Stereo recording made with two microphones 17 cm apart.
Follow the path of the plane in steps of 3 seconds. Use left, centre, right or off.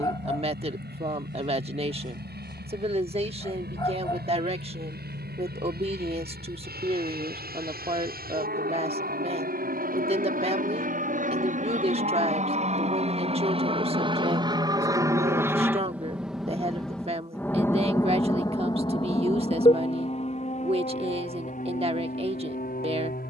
right, right, right, right, right, centre, left, left.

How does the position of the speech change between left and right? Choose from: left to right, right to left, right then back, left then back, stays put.
stays put.